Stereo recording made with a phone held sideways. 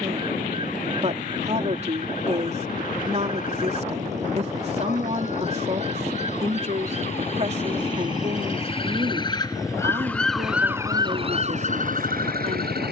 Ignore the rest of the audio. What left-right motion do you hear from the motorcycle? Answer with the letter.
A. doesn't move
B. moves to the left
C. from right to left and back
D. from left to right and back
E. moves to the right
B.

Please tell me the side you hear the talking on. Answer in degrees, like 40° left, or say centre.
40° right.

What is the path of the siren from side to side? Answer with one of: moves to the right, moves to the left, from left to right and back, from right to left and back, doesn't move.
moves to the right.